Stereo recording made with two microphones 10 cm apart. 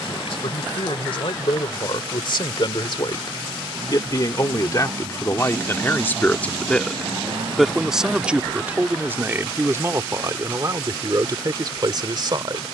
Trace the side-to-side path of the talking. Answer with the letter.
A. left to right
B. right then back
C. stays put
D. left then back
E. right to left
A.